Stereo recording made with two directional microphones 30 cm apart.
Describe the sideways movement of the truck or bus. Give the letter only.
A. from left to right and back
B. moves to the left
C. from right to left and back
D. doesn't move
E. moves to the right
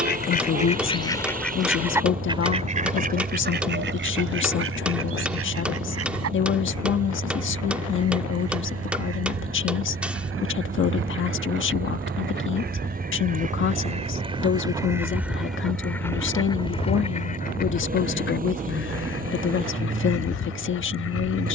D.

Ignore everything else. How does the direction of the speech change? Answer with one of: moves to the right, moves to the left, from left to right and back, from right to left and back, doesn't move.
doesn't move.